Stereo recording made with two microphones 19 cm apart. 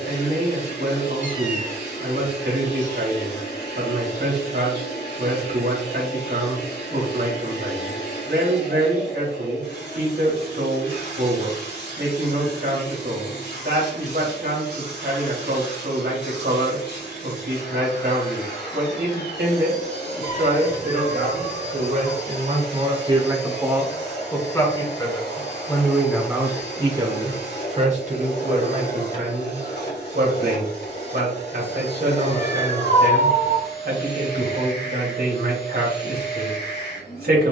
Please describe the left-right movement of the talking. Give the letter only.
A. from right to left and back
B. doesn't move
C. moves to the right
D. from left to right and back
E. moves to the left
A.